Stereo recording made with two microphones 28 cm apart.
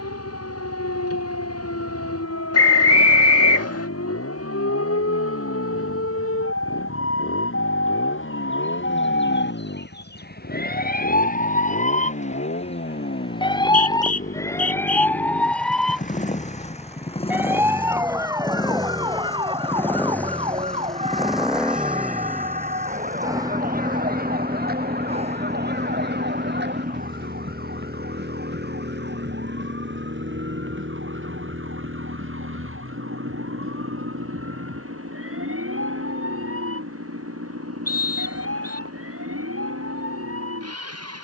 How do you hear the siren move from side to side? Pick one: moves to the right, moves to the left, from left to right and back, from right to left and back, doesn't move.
moves to the right.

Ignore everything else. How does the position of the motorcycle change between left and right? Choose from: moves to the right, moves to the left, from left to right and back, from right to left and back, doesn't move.
moves to the right.